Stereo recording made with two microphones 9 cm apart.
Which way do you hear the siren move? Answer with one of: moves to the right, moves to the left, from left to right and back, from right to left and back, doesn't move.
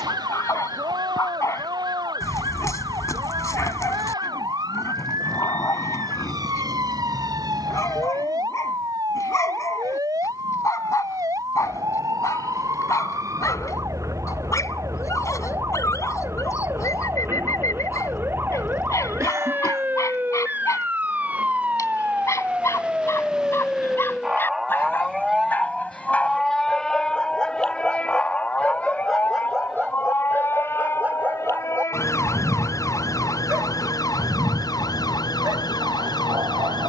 moves to the left.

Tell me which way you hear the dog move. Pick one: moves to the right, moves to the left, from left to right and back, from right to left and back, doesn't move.
moves to the right.